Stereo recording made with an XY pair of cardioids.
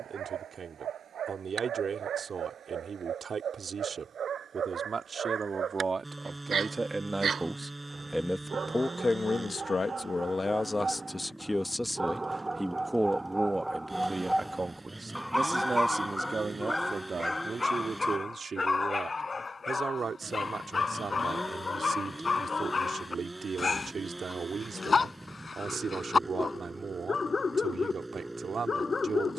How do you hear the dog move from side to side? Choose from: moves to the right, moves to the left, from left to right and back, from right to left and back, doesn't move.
moves to the left.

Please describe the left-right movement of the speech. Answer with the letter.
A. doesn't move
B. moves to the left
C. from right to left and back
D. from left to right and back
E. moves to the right
C.